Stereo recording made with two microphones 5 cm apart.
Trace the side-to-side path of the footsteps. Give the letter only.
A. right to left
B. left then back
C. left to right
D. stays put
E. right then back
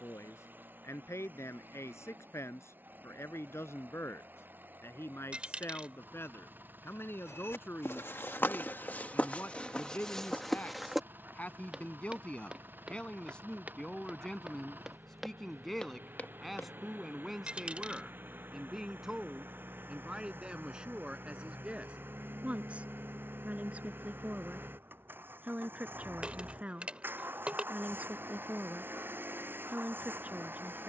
E.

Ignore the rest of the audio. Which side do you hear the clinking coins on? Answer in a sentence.
You can hear the clinking coins on the right.